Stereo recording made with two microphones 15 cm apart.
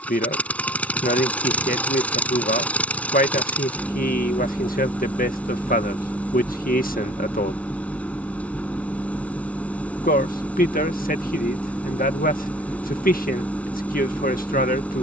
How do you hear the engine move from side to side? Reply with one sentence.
In this clip you hear the engine stay put.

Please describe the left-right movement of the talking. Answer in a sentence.
In this clip you hear the talking stay in one place.